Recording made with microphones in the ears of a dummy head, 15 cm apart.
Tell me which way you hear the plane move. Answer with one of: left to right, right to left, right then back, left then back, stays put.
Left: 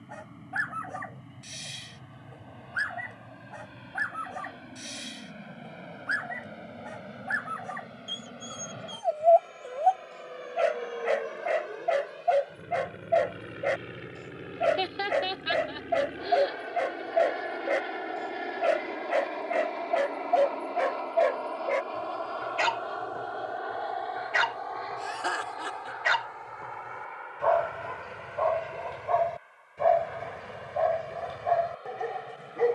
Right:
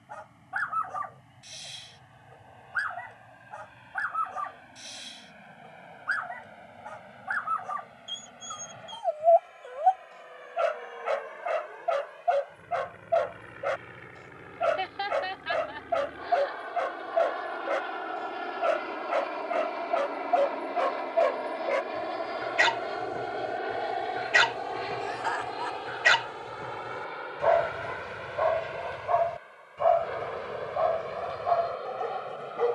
left to right.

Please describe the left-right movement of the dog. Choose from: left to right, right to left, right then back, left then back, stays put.
right then back.